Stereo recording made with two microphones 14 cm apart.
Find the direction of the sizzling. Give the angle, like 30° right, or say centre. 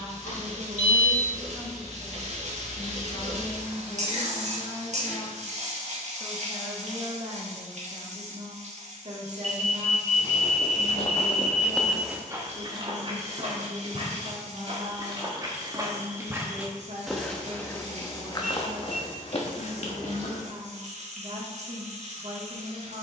60° right.